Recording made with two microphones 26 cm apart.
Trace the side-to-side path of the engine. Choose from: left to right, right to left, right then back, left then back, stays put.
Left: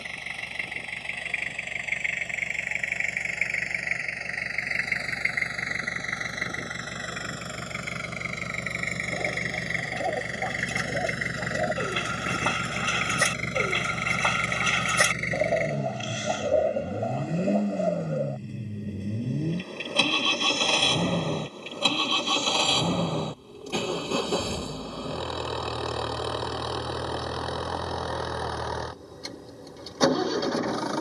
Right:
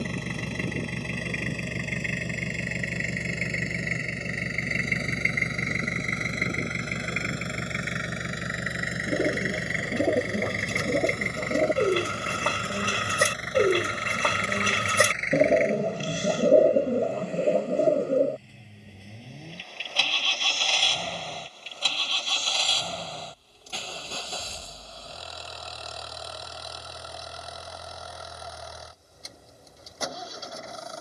right to left.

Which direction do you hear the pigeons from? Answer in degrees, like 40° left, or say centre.
50° right.